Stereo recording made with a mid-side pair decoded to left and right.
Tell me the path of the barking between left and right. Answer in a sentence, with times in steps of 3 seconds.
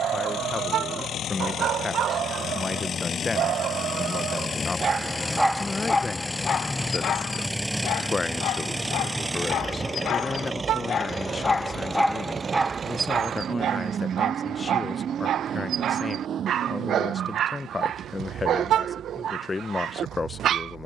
You can hear the barking on the right from 0 s, on the left from 6 s and on the right from 12 s.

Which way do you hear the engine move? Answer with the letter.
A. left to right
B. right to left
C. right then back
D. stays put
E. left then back
A.